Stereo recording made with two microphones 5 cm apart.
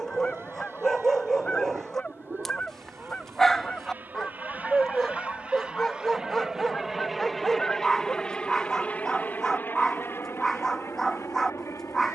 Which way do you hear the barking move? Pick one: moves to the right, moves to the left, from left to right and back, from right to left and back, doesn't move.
doesn't move.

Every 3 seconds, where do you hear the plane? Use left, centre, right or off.
right, right, centre, left.